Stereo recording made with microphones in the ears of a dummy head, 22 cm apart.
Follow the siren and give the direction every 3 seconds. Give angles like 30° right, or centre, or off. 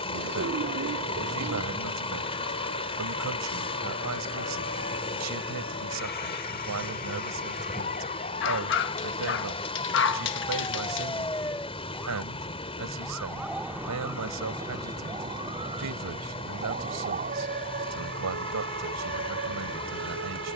50° left, 50° left, 30° left, 20° left, 10° right, 30° right, 40° right.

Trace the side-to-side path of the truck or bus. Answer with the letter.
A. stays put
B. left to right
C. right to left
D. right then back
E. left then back
A.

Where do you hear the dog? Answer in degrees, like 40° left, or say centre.
50° left.